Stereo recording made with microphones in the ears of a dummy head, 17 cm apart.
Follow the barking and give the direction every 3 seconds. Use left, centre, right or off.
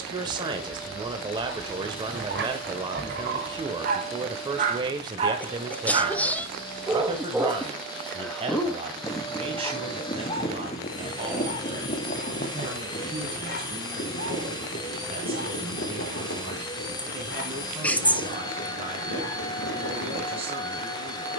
right, right, centre, left, left, left, left.